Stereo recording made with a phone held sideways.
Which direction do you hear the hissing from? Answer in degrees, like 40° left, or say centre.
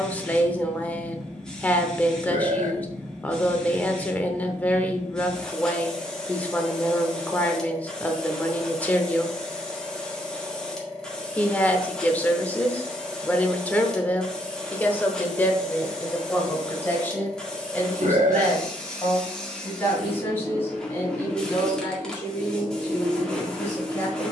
10° left.